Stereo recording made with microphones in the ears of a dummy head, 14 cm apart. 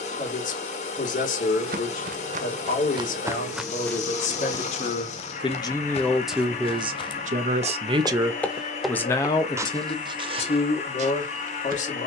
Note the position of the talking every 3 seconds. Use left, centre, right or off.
left, left, right, left.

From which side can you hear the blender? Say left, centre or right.
left.